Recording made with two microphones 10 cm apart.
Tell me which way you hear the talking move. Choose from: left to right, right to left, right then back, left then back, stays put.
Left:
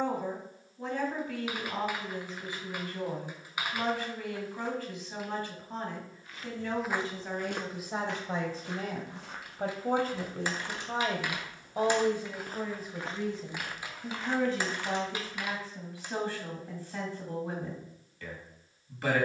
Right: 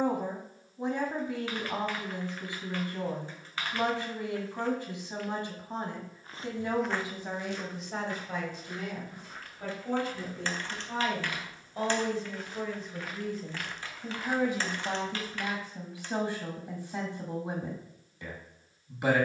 left then back.